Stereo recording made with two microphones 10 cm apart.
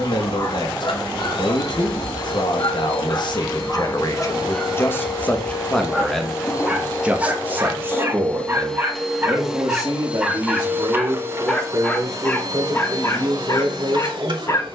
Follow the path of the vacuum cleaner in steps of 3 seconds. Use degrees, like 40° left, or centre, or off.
60° left, 50° left, 20° left, 20° right, 40° right.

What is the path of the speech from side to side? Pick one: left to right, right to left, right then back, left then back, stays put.
left to right.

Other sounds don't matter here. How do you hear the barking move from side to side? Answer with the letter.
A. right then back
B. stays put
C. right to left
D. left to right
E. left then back
A.